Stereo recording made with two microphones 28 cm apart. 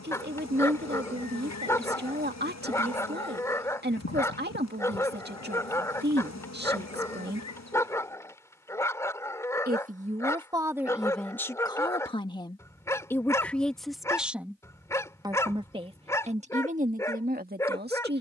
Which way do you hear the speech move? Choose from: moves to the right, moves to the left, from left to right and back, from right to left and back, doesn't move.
from right to left and back.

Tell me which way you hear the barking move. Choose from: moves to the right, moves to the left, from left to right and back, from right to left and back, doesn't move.
doesn't move.